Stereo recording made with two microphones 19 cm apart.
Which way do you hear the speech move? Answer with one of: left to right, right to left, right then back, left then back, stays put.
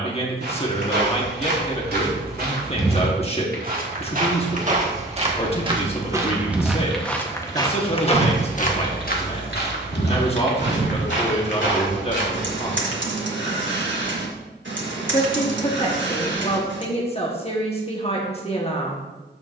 stays put.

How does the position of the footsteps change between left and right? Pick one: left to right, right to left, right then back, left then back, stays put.
right to left.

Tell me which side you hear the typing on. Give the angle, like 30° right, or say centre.
80° right.